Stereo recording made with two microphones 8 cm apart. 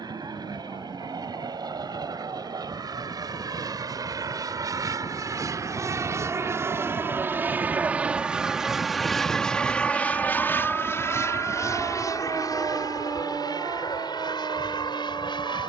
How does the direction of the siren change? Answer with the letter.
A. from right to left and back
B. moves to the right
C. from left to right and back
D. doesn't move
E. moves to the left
B.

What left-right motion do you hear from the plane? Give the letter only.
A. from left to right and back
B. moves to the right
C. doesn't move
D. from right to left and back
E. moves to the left
E.